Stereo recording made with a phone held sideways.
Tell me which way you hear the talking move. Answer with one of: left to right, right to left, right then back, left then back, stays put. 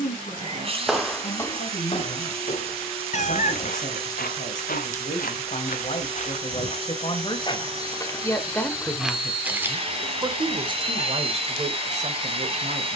left to right.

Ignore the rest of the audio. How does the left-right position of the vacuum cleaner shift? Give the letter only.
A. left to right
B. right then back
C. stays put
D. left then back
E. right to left
C.